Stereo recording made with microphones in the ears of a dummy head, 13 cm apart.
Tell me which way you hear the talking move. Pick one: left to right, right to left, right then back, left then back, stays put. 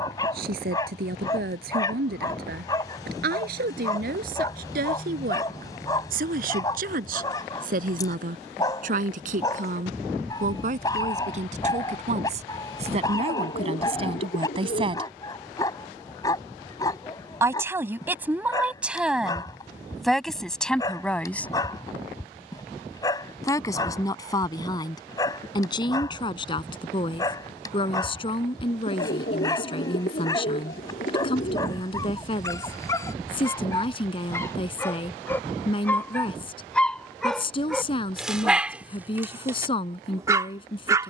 right to left.